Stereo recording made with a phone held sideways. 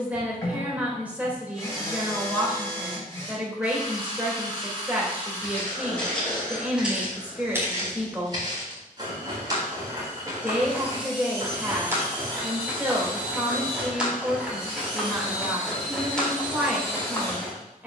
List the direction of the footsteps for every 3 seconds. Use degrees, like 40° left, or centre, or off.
off, 10° left, 10° right, 20° right, 10° right, 10° left.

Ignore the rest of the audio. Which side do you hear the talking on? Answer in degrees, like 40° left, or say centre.
10° right.